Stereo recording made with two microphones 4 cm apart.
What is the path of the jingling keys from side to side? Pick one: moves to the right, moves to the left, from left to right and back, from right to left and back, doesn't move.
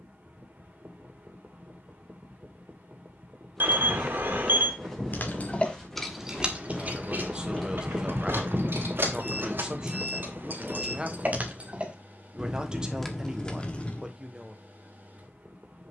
from left to right and back.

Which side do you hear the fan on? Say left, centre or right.
right.